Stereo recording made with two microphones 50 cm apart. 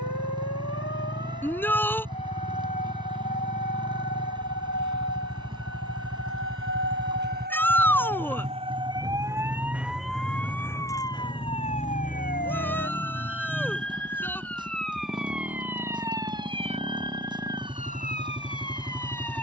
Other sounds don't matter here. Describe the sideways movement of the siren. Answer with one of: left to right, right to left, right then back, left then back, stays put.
right to left.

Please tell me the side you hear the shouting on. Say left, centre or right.
centre.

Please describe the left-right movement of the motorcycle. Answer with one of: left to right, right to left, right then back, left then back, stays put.
stays put.